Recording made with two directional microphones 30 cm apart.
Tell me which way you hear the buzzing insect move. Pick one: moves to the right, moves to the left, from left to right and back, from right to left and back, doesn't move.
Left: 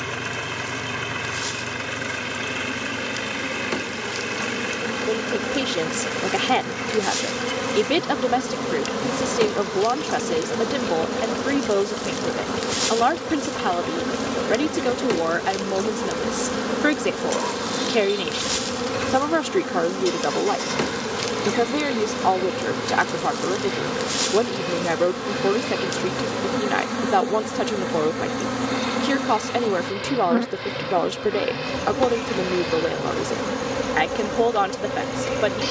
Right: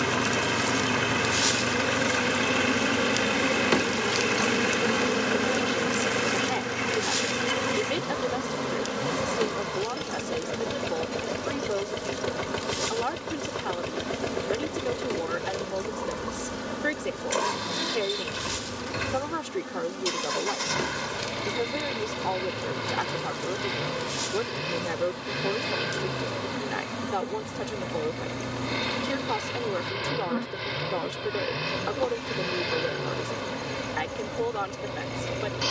moves to the left.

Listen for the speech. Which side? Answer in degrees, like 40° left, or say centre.
60° left.